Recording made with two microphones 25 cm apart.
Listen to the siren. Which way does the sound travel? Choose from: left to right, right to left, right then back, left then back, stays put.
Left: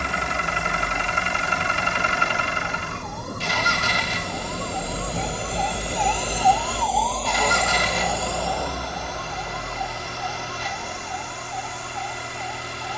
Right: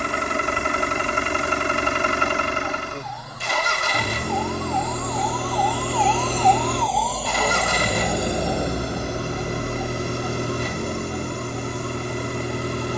left to right.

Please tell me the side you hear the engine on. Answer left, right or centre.
right.